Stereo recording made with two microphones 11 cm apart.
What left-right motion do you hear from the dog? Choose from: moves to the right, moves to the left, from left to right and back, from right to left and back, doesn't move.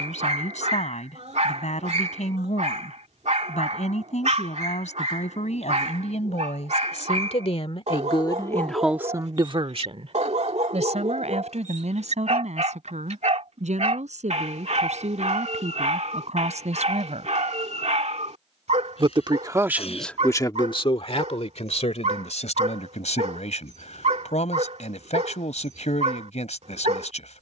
doesn't move.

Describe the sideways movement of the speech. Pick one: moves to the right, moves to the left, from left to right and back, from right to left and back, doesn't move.
from left to right and back.